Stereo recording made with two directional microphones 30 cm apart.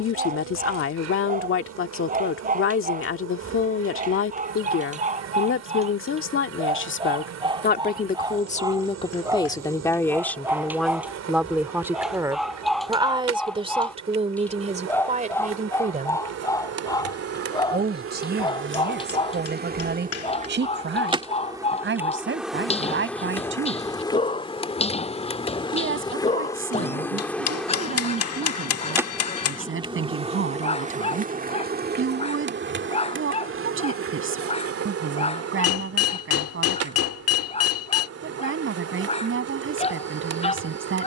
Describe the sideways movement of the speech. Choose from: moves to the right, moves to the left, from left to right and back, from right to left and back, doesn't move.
moves to the right.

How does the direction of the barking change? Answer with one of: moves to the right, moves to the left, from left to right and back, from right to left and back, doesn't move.
moves to the left.